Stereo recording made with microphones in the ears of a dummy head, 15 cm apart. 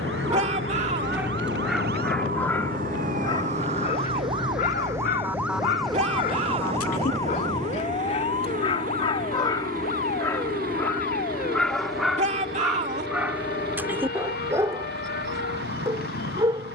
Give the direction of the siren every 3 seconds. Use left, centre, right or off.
right, right, left, left, left, left.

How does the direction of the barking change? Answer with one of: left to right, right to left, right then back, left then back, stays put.
left then back.